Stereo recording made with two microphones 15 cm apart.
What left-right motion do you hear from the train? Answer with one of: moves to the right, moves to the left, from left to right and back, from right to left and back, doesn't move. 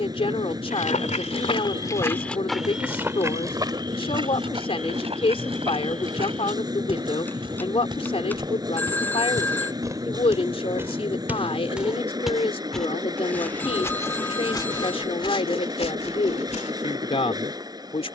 doesn't move.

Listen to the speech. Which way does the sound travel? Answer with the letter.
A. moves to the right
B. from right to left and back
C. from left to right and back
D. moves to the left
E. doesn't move
E.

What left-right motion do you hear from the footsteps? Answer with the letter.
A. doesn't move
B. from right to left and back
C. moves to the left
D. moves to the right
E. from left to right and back
E.